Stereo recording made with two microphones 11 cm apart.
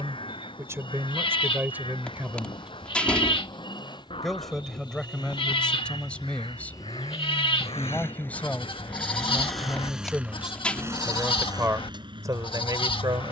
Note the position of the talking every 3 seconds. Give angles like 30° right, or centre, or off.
20° right, 10° left, 10° left, 10° right, 40° right.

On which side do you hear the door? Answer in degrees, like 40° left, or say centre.
10° left.